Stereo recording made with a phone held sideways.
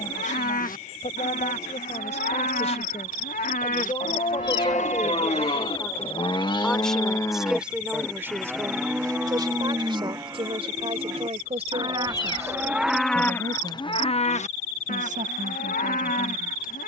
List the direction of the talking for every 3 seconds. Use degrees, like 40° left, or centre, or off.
50° left, 30° left, 10° right, 40° right, 50° right, 60° right.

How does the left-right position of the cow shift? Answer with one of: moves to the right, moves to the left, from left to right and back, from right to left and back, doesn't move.
from left to right and back.